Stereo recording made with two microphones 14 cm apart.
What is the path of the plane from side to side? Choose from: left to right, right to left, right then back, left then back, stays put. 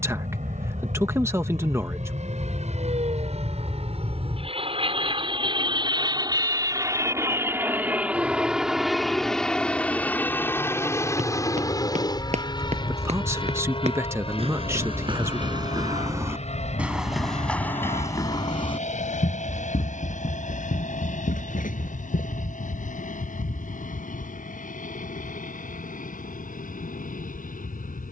right to left.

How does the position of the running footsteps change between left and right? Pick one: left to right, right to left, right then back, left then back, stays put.
right to left.